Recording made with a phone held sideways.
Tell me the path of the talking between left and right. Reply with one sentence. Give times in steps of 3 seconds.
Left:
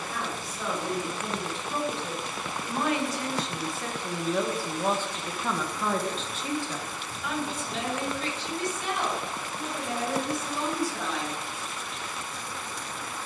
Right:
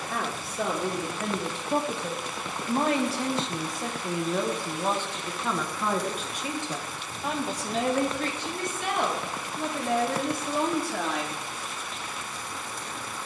In this clip you hear the talking on the right from 0 s, in the centre from 3 s, on the right from 6 s and not at all from 12 s.